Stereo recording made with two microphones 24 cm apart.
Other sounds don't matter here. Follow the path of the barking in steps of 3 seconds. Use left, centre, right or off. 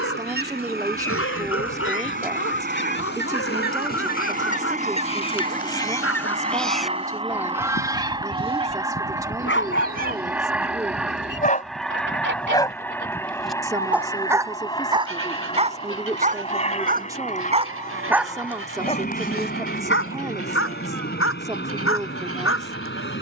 left, left, left, left, centre, right, left, left.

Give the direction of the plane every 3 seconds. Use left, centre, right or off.
right, right, right, centre, centre, left, left, left.